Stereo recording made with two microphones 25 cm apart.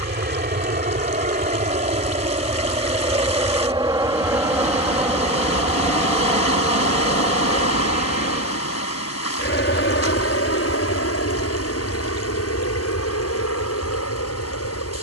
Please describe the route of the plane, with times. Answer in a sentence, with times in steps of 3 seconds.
In this clip you hear the plane on the right from 0 s, in the centre from 3 s and on the left from 6 s.